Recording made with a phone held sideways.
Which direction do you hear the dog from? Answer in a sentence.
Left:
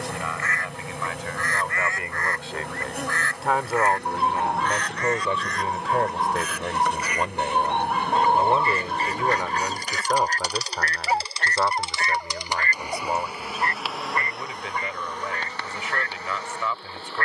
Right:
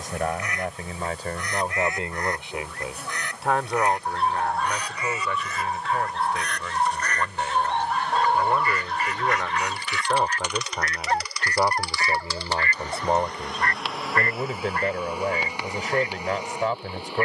In this clip you hear the dog in the centre.